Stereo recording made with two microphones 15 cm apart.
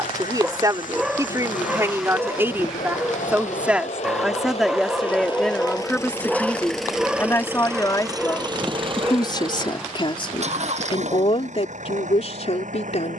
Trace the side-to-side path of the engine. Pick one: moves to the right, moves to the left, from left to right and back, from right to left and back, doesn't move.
moves to the right.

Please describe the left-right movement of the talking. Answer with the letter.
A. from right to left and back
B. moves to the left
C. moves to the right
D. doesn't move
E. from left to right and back
B.